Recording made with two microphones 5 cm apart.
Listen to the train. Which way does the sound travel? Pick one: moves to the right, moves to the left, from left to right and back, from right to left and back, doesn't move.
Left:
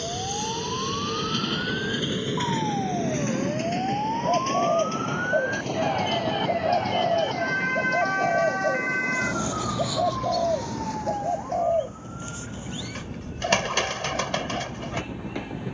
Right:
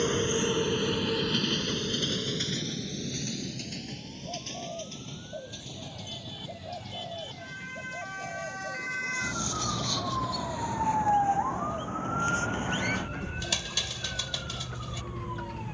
moves to the left.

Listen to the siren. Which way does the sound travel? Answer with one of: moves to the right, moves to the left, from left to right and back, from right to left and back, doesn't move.
moves to the right.